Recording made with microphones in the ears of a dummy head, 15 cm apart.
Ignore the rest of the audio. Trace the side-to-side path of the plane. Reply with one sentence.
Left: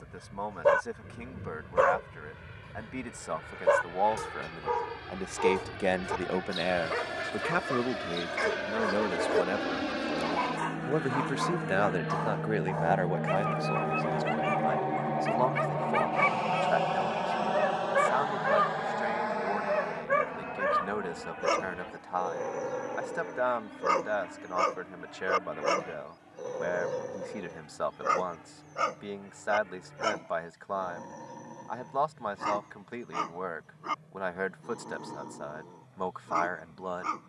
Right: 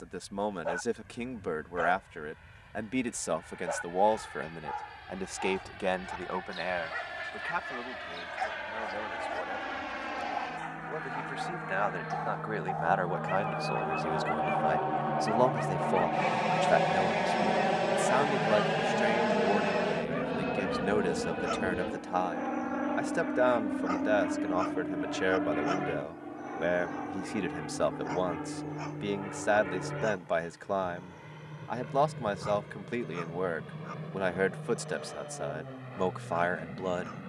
In this clip you hear the plane move to the right.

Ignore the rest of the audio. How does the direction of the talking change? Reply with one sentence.
In this clip you hear the talking move from right to left and back again.